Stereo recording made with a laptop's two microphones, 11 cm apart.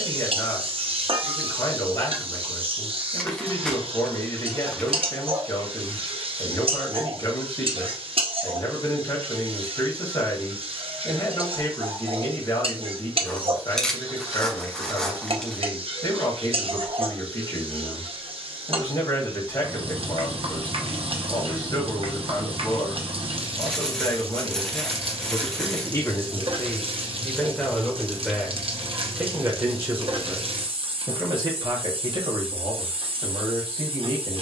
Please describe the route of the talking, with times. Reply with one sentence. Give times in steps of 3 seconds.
You can hear the talking on the left from 0 s, in the centre from 27 s and on the right from 30 s.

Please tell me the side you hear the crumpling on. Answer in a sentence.
You can hear the crumpling in the centre.